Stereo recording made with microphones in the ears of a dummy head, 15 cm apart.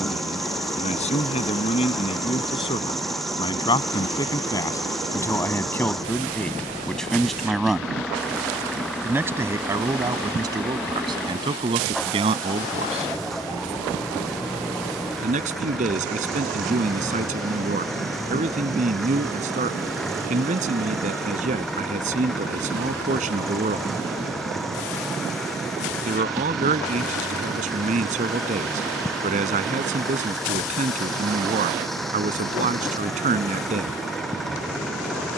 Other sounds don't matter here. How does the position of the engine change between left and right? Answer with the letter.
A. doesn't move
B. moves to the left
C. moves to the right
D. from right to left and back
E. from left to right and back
A.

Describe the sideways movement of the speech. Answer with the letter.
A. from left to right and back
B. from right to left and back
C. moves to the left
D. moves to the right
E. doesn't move
D.